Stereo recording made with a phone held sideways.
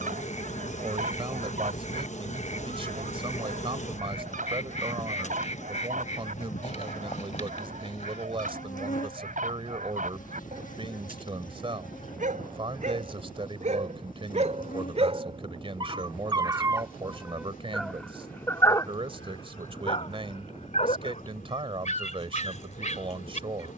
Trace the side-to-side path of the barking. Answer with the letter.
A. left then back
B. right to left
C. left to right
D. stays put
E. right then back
B.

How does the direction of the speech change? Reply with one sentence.
You can hear the speech stay put.